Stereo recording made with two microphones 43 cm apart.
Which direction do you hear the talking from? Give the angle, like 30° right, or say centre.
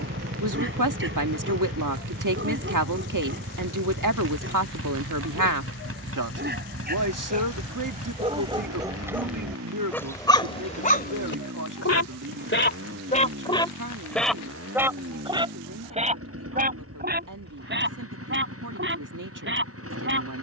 50° right.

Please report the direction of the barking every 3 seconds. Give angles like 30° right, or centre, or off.
30° right, 30° right, 20° right, 10° left, 10° left, 20° right, 30° right.